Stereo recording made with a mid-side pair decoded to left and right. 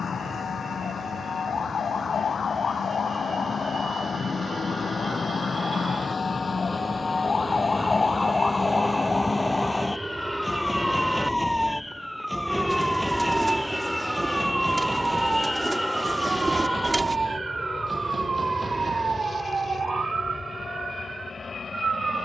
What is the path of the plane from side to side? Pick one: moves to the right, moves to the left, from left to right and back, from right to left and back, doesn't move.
moves to the left.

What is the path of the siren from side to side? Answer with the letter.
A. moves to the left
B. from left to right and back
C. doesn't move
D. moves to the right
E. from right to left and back
D.